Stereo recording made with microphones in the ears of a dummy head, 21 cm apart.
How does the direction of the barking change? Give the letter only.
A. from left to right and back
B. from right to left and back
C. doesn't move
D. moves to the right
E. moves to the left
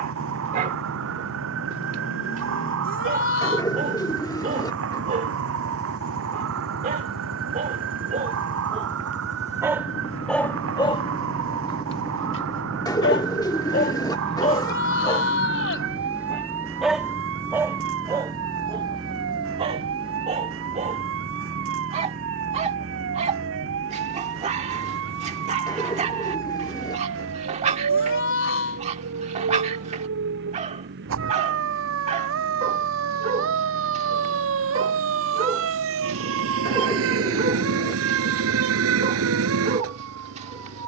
B.